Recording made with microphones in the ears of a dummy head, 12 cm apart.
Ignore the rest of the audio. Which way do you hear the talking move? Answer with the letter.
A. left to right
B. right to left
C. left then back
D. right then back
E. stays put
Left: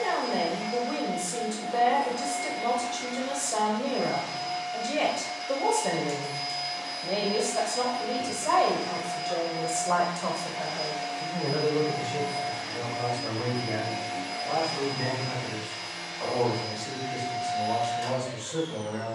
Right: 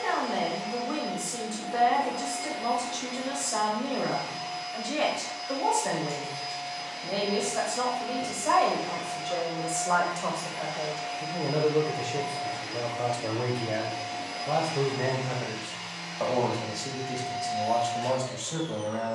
A.